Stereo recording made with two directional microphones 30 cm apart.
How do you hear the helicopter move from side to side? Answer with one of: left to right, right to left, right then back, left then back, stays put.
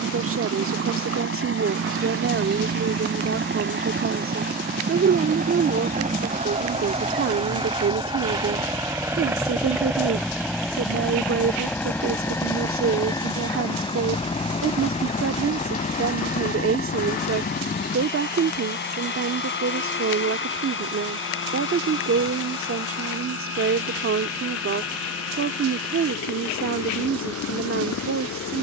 right to left.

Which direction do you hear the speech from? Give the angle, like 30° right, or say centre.
50° right.